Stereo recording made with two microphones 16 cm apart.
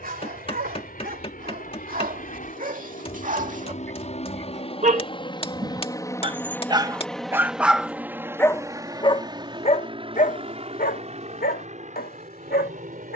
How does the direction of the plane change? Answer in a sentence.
You can hear the plane move from left to right.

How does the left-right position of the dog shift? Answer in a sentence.
You can hear the dog go from the right side to the left.